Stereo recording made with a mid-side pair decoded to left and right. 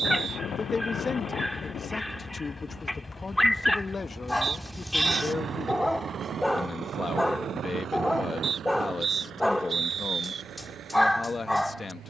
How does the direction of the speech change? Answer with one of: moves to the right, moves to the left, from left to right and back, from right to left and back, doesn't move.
doesn't move.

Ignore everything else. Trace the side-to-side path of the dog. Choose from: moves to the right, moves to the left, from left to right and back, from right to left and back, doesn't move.
doesn't move.